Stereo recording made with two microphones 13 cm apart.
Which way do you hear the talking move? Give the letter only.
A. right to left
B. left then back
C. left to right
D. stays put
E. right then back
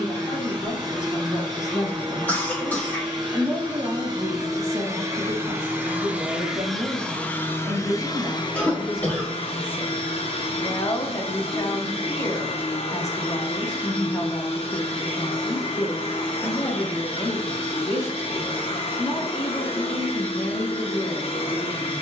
E.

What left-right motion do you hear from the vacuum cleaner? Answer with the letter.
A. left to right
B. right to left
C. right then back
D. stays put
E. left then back
B.